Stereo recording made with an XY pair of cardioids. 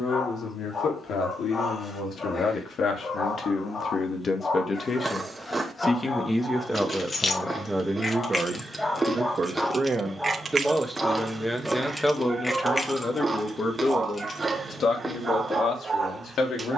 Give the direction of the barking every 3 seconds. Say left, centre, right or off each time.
left, left, left, centre, right, right.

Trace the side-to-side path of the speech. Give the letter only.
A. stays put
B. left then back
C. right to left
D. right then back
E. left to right
D.